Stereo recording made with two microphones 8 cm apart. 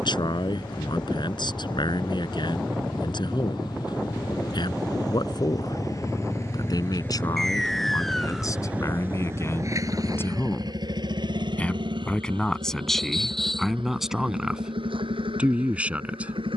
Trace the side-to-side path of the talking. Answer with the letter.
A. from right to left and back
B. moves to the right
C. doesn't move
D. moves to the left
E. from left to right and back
B.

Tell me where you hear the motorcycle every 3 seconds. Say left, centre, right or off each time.
left, left, centre, right, right, right.